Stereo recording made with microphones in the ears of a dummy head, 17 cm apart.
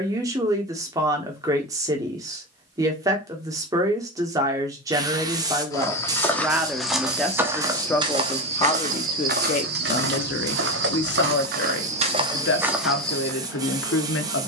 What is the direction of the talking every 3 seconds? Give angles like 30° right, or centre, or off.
20° right, 20° right, 10° left, 50° left, 70° left.